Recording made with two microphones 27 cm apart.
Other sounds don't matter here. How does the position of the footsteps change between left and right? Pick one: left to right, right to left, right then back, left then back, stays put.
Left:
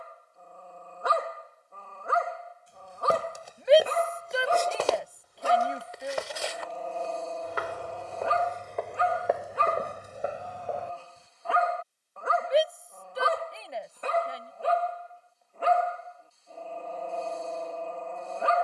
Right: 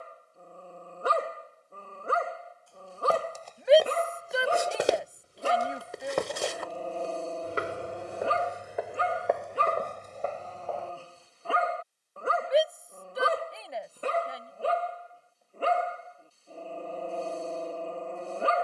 right then back.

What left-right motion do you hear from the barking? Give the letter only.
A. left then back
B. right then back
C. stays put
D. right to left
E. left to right
C.